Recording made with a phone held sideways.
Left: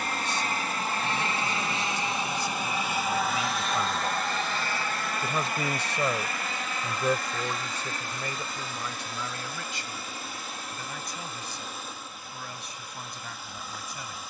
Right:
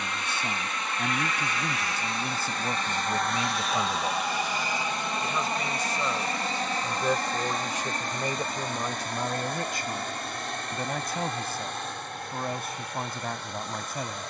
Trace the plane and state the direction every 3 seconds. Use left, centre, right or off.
left, centre, right, right, right.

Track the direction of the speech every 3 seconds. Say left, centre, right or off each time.
right, centre, centre, right, right.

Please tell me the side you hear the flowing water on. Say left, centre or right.
centre.